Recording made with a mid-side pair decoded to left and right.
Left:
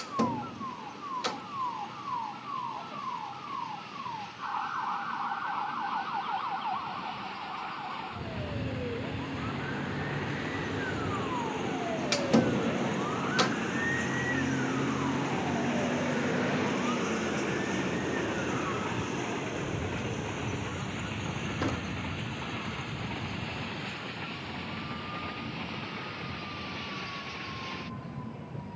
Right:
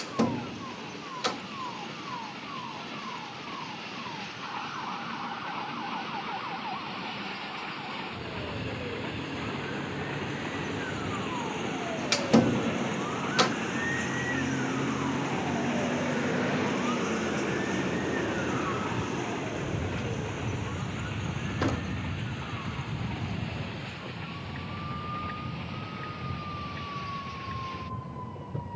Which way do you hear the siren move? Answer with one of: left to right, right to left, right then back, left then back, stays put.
left to right.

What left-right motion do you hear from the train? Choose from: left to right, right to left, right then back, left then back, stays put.
right to left.